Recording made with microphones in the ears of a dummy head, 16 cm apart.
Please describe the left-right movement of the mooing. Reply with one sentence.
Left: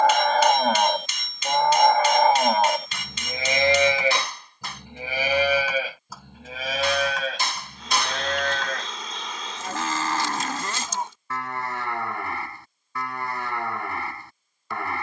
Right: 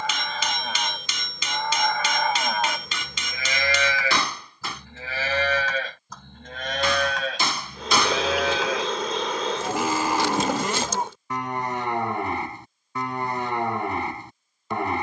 You can hear the mooing move from left to right.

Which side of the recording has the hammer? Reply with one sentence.
In this clip you hear the hammer on the right.